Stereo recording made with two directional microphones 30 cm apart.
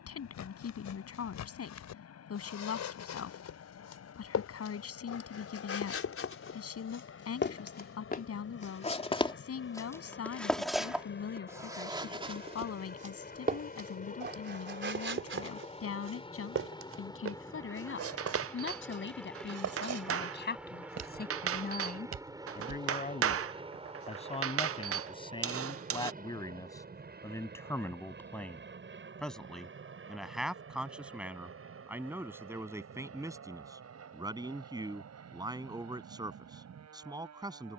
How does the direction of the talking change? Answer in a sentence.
In this clip you hear the talking travel towards the right.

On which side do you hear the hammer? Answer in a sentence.
In this clip you hear the hammer on the right.